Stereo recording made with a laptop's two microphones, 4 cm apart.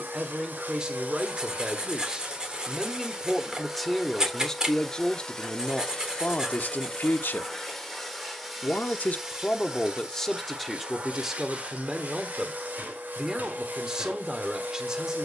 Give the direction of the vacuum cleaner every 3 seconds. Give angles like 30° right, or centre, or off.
40° right, centre, 10° left, 20° right, 50° right.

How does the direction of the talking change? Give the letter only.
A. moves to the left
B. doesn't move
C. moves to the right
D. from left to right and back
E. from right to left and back
E.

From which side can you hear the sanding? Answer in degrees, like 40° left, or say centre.
20° right.